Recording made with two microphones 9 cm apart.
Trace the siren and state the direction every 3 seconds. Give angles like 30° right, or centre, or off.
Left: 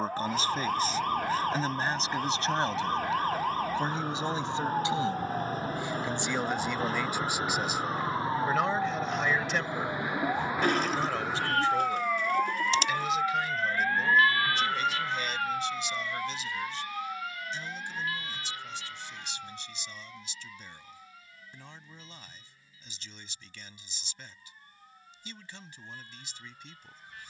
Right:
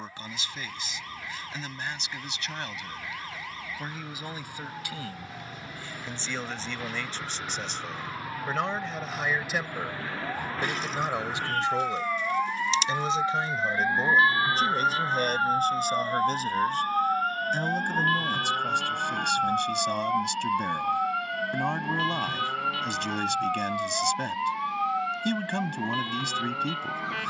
50° left, 40° left, 30° left, 10° left, 10° right, 40° right, 60° right, 70° right, 80° right.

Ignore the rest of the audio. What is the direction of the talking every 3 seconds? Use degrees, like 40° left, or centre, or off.
30° left, 20° left, 10° left, 10° right, 30° right, 50° right, 60° right, 60° right, 60° right.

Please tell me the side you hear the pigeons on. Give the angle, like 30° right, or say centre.
50° left.